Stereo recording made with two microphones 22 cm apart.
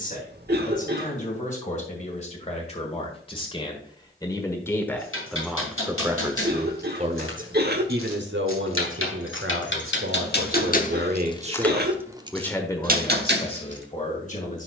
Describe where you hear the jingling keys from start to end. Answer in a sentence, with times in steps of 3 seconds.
You can hear the jingling keys not at all from 0 s, on the left from 3 s and on the right from 12 s.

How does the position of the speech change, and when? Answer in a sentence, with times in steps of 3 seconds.
In this clip you hear the speech on the left from 0 s, in the centre from 3 s, on the right from 6 s and on the left from 12 s.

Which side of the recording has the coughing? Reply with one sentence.
You can hear the coughing on the right.